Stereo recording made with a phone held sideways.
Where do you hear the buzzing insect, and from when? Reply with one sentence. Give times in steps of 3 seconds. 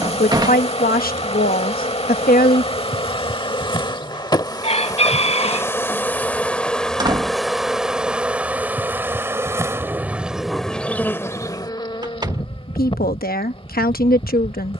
You can hear the buzzing insect on the left from 0 s, in the centre from 6 s and on the left from 12 s.